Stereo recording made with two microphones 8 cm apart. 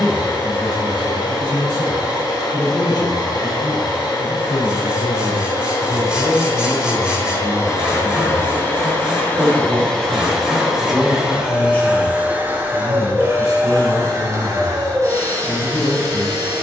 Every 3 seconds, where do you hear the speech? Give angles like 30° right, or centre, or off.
50° left, 40° left, centre, 10° right, 40° left, 50° left.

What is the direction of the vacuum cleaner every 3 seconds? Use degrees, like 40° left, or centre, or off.
50° left, 50° left, 30° left, centre, 30° right, 40° right.